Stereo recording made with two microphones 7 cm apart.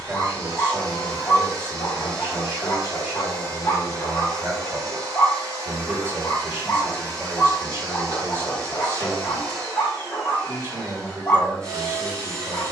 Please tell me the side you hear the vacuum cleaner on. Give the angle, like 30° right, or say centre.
50° right.